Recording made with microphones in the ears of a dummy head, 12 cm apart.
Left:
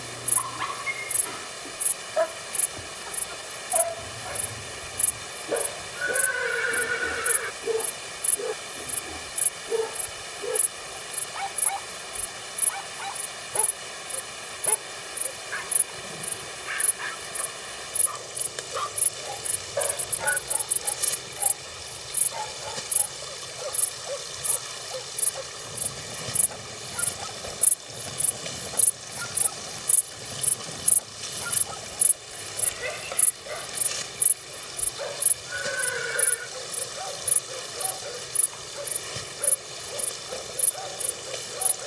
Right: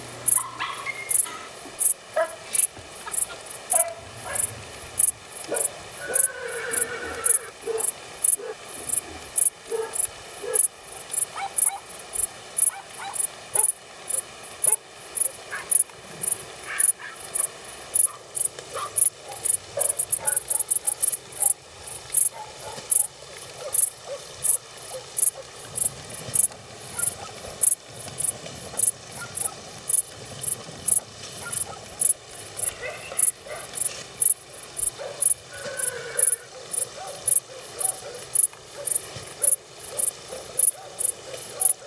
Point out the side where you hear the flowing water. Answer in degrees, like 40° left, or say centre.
30° left.